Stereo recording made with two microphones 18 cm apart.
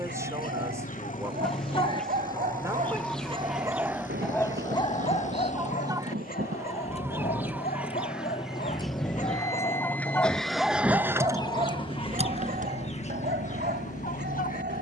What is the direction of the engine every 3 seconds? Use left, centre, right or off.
left, left, left, centre, right.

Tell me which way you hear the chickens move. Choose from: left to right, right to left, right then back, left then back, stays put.
right then back.